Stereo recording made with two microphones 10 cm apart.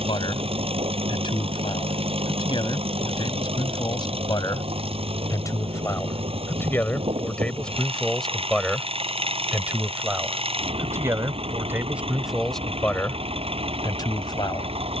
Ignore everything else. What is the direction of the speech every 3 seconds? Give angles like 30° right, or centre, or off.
50° left, 40° left, 10° left, 20° right, 20° left.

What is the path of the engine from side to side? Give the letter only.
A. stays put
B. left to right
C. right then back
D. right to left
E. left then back
A.